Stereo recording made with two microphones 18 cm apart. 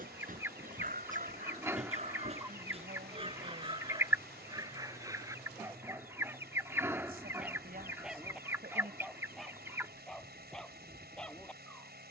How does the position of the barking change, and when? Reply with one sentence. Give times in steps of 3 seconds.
In this clip you hear the barking on the right from 0 s and in the centre from 6 s.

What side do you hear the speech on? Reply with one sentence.
In this clip you hear the speech on the right.